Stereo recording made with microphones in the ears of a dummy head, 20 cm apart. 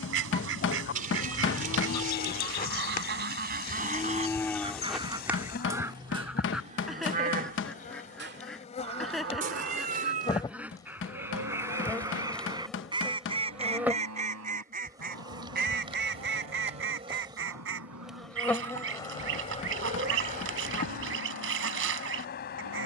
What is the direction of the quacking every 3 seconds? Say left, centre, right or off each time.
right, right, centre, centre, right, right, right, right.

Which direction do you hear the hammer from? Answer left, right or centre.
left.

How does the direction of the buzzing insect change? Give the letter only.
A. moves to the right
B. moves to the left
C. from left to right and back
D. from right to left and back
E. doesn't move
C.